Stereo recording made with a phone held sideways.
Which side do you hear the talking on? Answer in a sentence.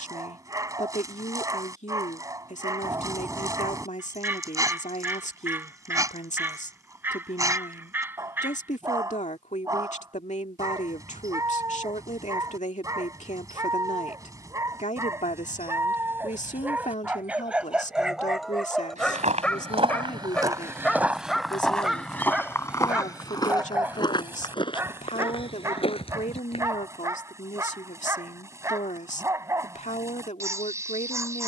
In this clip you hear the talking on the left.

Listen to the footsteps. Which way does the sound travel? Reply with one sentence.
You can hear the footsteps go from the right side to the left.